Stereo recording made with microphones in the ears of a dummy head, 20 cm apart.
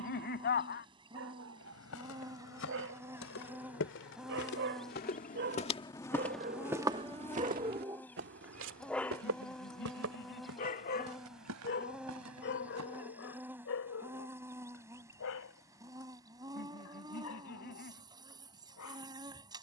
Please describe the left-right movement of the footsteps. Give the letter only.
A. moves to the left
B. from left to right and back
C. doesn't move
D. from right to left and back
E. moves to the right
E.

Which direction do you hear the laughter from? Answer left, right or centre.
left.